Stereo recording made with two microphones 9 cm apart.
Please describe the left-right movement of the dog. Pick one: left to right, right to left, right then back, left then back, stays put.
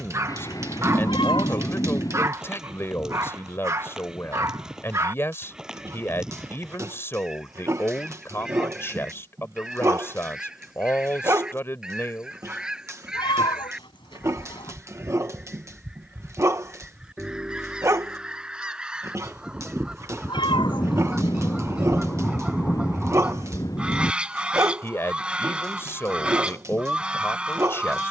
stays put.